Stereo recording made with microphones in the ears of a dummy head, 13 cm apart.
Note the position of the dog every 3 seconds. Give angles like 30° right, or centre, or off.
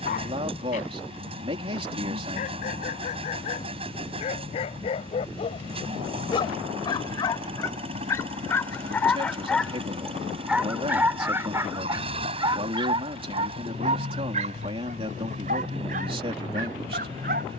50° left, 40° left, 30° left, 10° right, 40° right, 60° right.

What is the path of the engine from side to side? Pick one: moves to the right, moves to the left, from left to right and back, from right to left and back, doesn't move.
doesn't move.